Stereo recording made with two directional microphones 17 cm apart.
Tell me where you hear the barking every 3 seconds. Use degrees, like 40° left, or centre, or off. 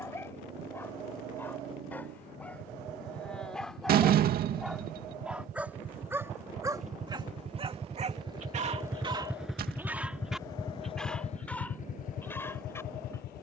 10° left, centre, 30° right, centre, 10° left.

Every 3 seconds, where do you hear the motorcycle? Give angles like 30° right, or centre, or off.
70° right, 60° right, 40° right, 20° left, 60° left.